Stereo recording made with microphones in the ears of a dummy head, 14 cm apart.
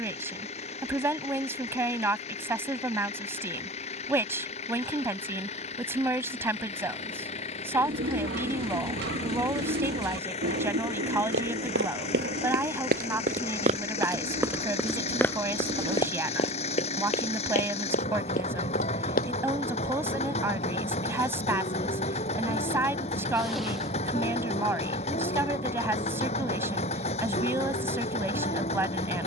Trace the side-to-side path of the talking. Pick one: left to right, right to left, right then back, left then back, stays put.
stays put.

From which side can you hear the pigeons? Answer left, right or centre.
right.